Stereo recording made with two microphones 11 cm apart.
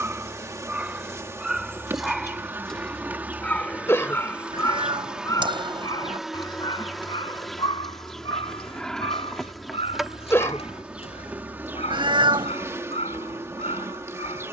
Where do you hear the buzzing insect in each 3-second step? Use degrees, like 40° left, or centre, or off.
20° right, 10° right, centre, 10° right, 20° right.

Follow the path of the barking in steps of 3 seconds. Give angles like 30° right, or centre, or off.
10° right, 20° left, 50° left, 70° left, 80° left.